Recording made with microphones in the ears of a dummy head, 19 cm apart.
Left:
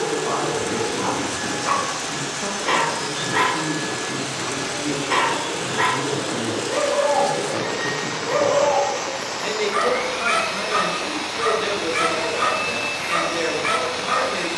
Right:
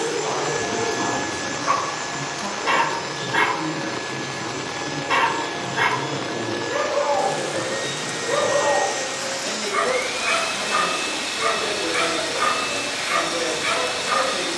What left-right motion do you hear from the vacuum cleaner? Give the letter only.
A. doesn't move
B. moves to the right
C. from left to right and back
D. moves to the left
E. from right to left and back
E.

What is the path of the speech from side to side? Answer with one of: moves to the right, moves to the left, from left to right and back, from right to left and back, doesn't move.
doesn't move.